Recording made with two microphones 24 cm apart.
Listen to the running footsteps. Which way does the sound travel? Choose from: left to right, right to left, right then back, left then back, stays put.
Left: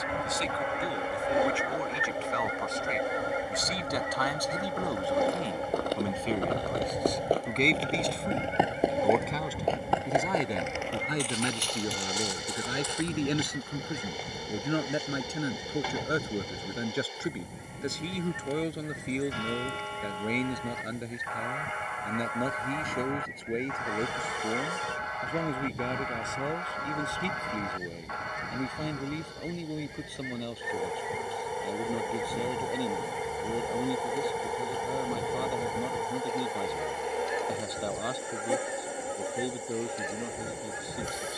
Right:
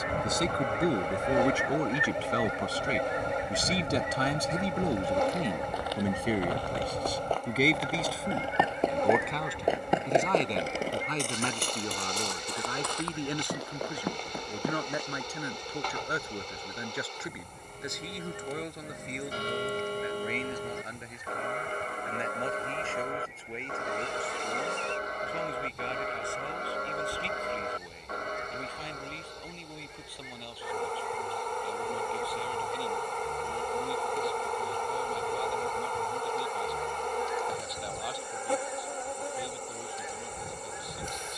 left to right.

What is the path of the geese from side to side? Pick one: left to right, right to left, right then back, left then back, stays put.
right to left.